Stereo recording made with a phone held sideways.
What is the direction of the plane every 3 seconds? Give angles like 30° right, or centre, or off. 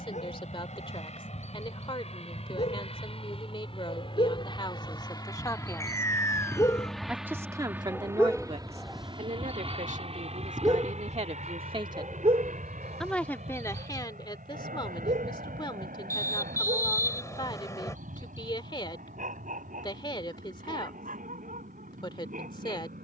60° left, 40° left, 10° right, 50° right, 60° right, 70° right, 80° right, 80° right.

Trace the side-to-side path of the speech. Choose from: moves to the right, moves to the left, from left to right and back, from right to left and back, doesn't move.
from left to right and back.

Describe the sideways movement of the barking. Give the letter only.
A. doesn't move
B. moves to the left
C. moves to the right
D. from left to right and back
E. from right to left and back
C.